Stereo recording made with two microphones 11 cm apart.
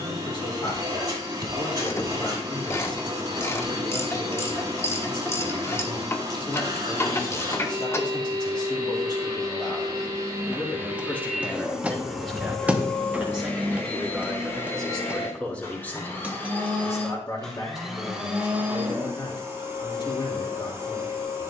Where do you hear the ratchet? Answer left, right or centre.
left.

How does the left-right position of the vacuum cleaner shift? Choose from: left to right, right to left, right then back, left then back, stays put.
left then back.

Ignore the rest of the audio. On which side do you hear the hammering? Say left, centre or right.
centre.